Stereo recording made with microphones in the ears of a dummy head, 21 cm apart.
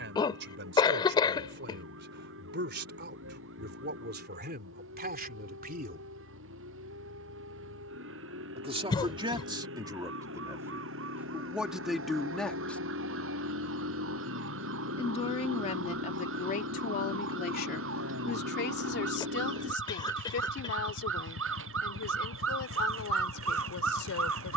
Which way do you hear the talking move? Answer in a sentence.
You can hear the talking move to the left.